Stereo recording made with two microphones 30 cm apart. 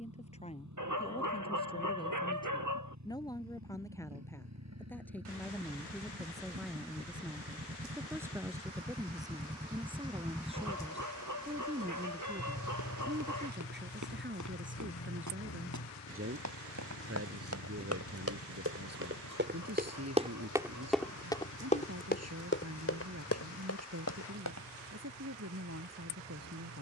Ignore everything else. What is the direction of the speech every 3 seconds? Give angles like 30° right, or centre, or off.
20° left, 10° left, centre, 20° right, 30° right, 50° right, 60° right, 60° right, 60° right.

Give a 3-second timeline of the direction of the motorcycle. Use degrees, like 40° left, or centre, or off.
70° right, 60° right, 40° right, 10° right, 40° left, 60° left, 70° left, 80° left, 80° left.